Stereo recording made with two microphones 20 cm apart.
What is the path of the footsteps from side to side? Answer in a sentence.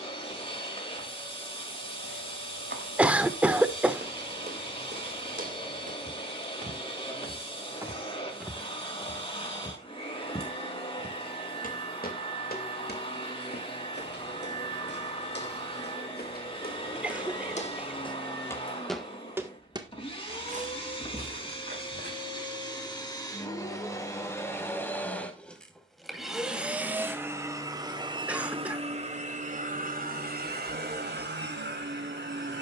You can hear the footsteps move from right to left and back again.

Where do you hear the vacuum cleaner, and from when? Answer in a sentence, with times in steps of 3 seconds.
You can hear the vacuum cleaner on the left from 0 s, in the centre from 24 s and on the right from 27 s.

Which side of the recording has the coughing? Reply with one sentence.
You can hear the coughing in the centre.